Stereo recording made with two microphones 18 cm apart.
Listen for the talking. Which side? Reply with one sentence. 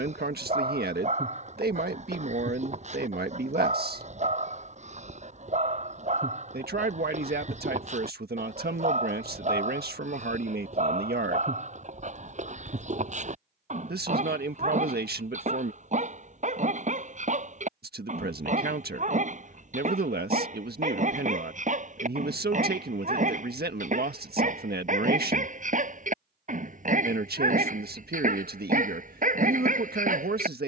You can hear the talking on the right.